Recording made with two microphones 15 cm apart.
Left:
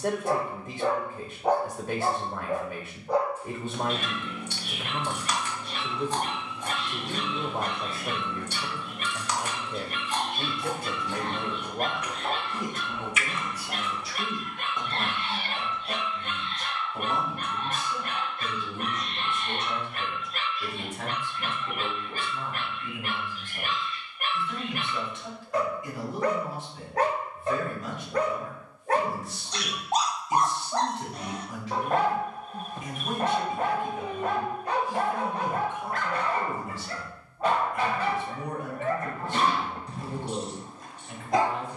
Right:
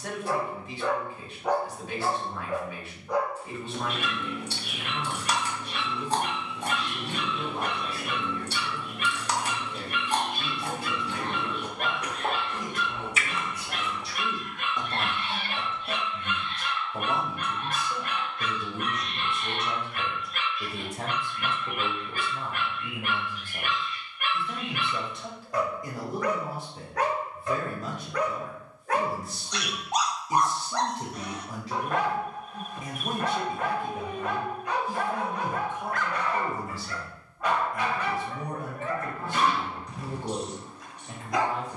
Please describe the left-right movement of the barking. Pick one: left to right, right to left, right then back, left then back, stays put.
stays put.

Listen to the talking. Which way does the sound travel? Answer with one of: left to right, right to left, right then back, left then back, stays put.
left to right.